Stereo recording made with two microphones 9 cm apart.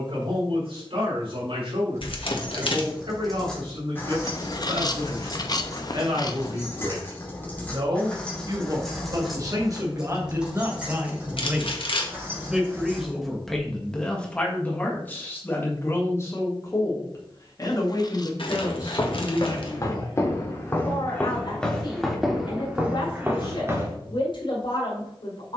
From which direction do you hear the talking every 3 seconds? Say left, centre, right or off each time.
right, right, right, right, centre, left, left, left, left.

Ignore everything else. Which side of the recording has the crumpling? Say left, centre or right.
left.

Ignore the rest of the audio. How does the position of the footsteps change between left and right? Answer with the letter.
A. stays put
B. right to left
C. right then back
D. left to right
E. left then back
D.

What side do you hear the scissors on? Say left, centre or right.
left.